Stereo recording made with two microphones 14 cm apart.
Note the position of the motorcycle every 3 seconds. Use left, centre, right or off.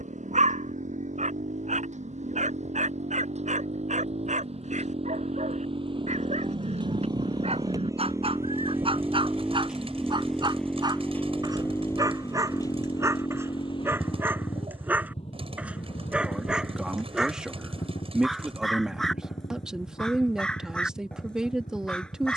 right, right, right, centre, left, left, left, left.